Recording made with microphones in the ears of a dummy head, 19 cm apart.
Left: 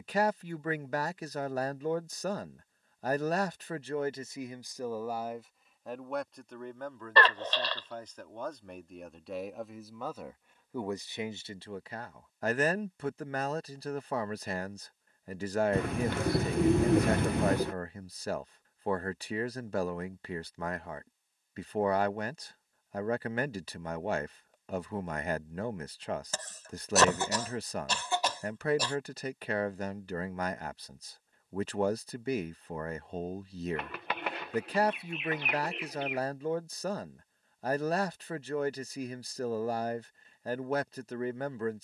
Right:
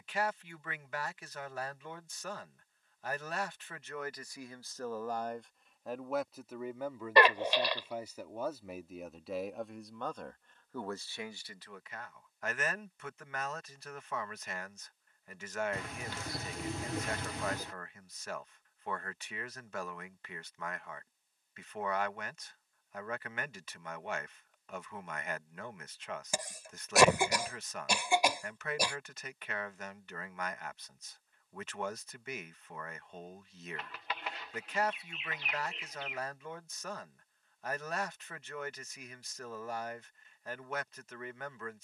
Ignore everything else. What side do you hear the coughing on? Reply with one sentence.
In this clip you hear the coughing in the centre.